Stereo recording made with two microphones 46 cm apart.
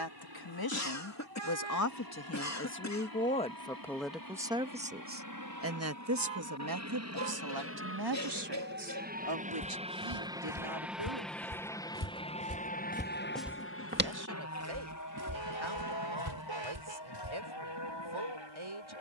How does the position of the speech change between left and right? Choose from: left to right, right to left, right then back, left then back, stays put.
left to right.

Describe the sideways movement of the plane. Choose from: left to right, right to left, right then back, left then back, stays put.
right to left.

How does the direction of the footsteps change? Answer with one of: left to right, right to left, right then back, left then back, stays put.
left to right.